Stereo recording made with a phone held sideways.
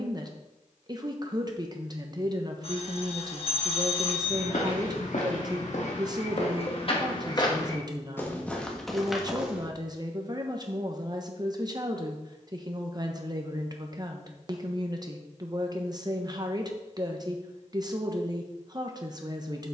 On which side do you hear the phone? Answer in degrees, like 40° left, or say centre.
50° left.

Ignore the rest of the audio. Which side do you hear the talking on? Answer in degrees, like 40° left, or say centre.
30° right.